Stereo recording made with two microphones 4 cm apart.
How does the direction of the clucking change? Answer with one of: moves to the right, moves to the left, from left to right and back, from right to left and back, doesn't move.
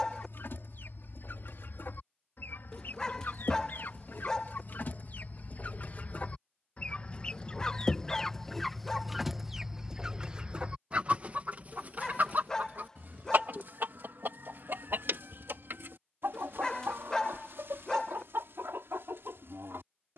moves to the right.